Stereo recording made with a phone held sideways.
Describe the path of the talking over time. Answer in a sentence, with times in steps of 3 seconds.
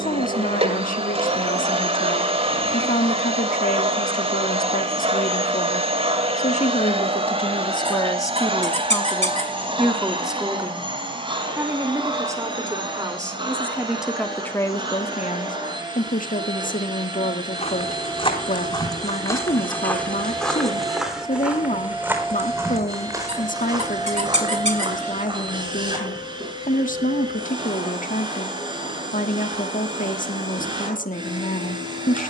You can hear the talking on the left from 0 s, in the centre from 9 s and on the left from 15 s.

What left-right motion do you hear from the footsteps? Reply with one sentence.
You can hear the footsteps move from left to right.